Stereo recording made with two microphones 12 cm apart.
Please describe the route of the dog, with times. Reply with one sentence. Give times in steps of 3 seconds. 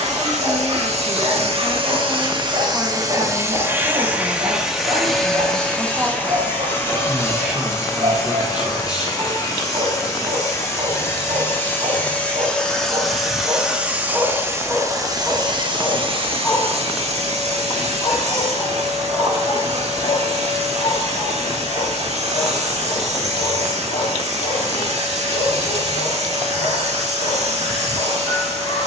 You can hear the dog on the right from 0 s, in the centre from 15 s and on the left from 18 s.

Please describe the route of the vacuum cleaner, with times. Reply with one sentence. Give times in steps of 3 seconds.
In this clip you hear the vacuum cleaner on the right from 0 s, in the centre from 3 s, on the left from 6 s, in the centre from 12 s and on the right from 15 s.